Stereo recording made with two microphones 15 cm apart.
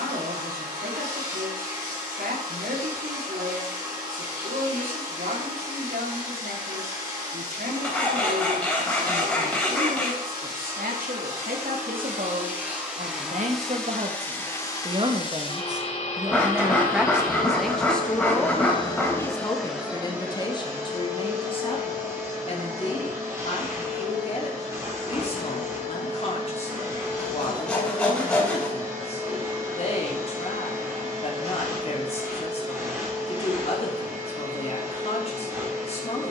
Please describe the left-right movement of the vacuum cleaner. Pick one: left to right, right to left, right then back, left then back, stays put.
left then back.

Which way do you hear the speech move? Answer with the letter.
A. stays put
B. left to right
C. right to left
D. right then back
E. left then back
C.